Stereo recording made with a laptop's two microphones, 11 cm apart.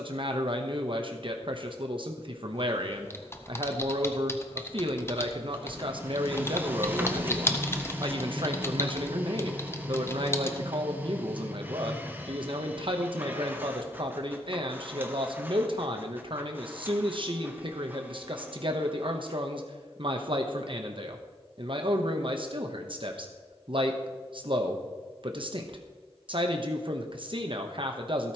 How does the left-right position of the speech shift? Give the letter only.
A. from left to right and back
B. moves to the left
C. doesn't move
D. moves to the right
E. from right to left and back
C.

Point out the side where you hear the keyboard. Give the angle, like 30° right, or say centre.
20° left.